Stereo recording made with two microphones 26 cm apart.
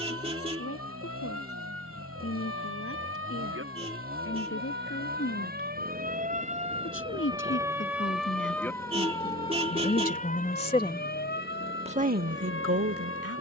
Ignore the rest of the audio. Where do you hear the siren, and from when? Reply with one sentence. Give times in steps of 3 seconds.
You can hear the siren on the right from 0 s, in the centre from 6 s and on the left from 9 s.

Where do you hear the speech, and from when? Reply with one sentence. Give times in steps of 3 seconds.
You can hear the speech on the left from 0 s and on the right from 12 s.